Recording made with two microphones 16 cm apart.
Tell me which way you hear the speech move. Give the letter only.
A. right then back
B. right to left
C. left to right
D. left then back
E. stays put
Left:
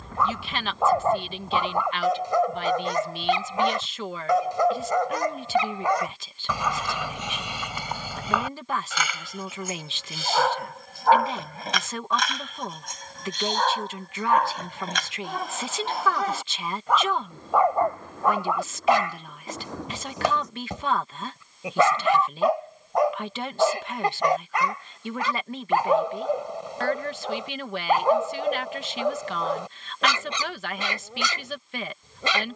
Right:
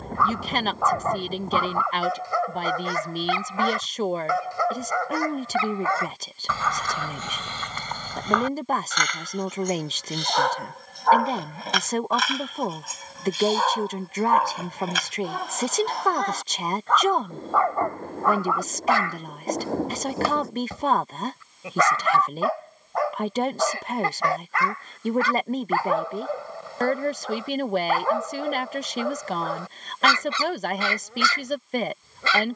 E.